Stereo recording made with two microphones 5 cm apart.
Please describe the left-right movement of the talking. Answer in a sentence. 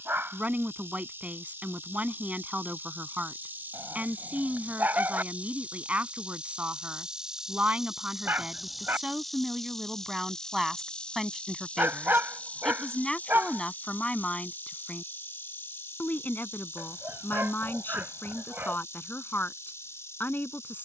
You can hear the talking move from right to left.